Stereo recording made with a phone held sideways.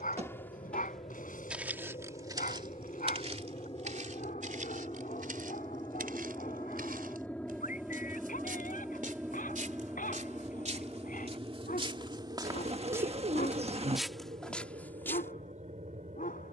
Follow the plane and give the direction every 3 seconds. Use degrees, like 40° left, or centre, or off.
50° left, 30° left, 10° left, 20° right, 40° right, 50° right.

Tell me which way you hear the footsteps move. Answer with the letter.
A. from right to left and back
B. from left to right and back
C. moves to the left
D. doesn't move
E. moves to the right
B.